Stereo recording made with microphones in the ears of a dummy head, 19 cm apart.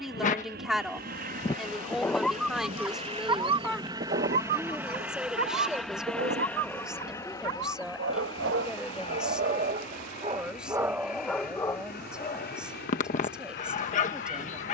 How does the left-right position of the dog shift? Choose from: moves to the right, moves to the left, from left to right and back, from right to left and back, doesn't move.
from left to right and back.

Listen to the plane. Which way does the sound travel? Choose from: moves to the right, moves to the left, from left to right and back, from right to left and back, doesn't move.
moves to the left.